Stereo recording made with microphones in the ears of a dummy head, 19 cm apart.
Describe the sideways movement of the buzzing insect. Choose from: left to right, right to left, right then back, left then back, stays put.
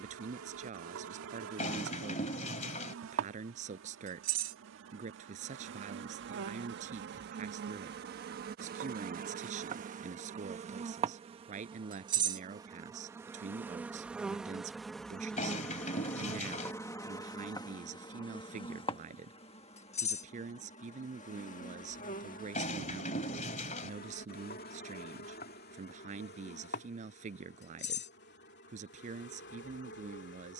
right to left.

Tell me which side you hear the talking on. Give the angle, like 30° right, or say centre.
40° right.